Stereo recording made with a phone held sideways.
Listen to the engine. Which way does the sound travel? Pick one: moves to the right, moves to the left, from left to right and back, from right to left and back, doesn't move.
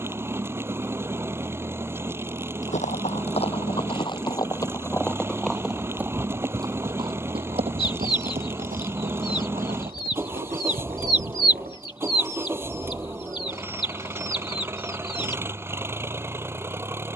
doesn't move.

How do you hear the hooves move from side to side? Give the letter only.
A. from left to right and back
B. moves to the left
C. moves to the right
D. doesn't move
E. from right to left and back
C.